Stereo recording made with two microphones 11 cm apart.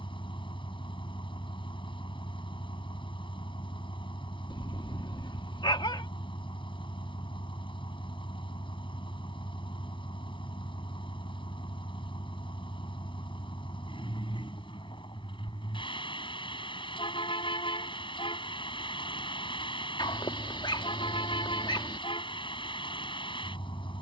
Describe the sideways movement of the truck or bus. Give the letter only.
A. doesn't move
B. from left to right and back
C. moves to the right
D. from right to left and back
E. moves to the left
A.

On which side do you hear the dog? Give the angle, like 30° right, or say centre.
50° left.